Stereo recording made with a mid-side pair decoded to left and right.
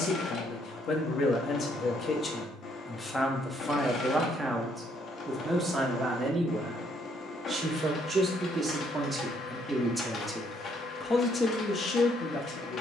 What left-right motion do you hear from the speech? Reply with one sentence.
You can hear the speech move from left to right and back again.